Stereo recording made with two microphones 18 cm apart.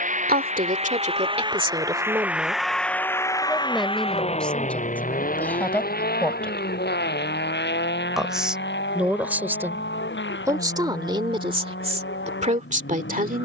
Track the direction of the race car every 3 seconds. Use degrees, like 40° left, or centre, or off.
20° right, 40° left, 60° left, 70° left, 80° left.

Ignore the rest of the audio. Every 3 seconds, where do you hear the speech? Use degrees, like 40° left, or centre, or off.
30° right, 10° left, centre, 20° right, 40° right.